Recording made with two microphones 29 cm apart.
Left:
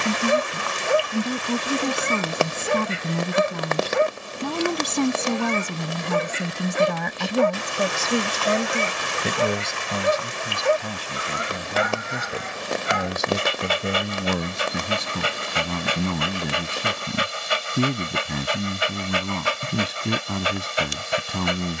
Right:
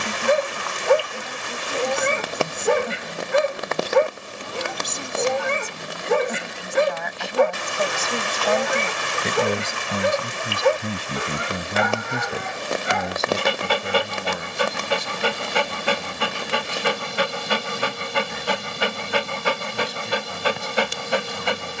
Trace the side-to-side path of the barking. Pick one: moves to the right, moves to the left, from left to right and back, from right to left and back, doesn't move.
doesn't move.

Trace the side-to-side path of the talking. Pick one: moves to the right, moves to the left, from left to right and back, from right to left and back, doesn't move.
from left to right and back.